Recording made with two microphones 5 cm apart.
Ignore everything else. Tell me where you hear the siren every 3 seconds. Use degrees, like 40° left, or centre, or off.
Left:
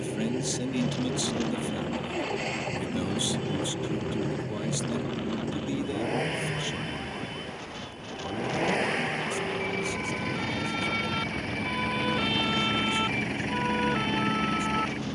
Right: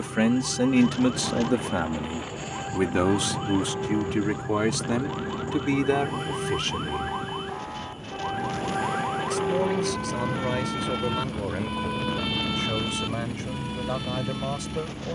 60° right, 50° right, 40° right, 20° right, 30° left.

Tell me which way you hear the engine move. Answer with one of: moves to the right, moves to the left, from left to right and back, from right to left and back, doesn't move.
doesn't move.